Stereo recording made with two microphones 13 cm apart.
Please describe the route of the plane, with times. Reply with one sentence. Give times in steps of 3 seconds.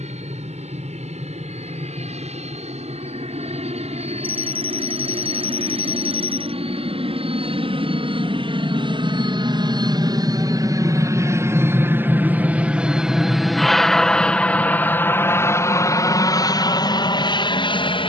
You can hear the plane on the right from 0 s, in the centre from 12 s and on the left from 15 s.